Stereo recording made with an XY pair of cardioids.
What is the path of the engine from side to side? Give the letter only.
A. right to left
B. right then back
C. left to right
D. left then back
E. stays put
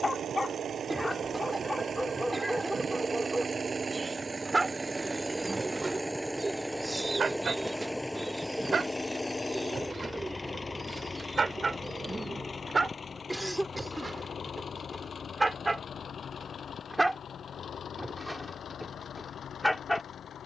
A.